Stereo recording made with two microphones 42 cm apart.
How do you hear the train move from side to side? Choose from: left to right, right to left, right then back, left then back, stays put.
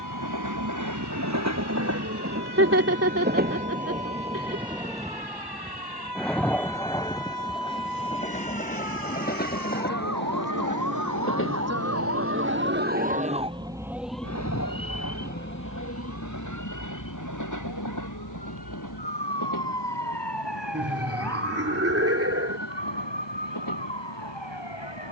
right to left.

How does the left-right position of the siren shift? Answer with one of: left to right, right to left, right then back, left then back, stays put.
right to left.